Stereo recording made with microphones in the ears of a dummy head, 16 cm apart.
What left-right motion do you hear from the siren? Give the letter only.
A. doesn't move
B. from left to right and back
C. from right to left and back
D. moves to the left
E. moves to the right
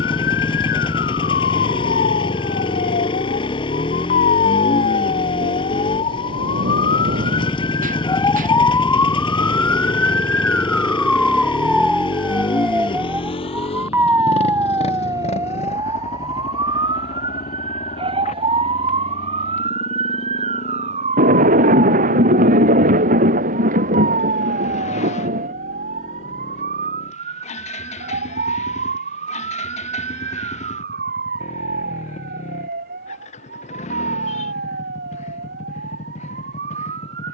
E.